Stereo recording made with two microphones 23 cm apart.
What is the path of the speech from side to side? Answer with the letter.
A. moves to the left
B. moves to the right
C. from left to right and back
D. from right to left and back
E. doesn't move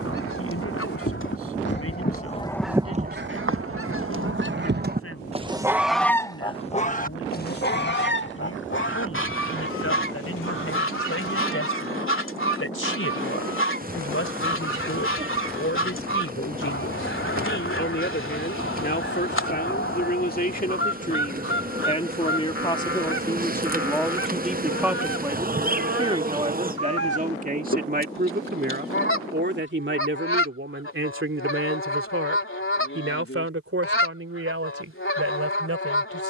B.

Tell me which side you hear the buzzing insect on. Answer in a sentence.
You can hear the buzzing insect on the right.